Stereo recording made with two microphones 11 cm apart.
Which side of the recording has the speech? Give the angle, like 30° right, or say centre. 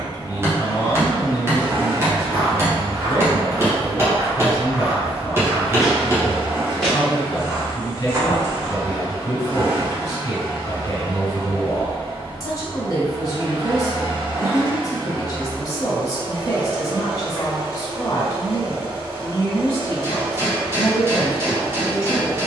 40° left.